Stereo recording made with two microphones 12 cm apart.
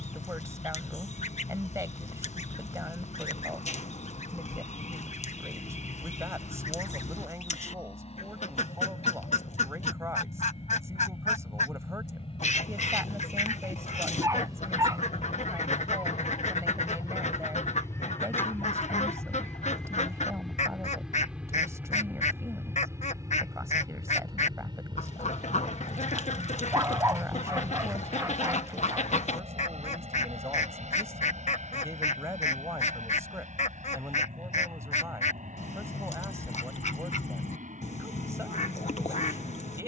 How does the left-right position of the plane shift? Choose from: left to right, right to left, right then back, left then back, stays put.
left to right.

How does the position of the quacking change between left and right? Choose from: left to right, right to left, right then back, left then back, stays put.
stays put.